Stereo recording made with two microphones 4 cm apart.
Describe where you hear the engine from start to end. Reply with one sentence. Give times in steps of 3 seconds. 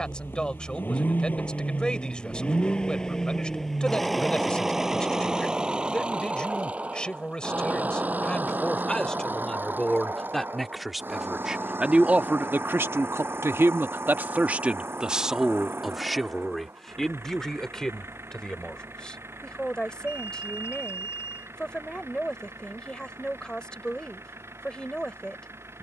In this clip you hear the engine on the left from 0 s, in the centre from 3 s and on the right from 6 s.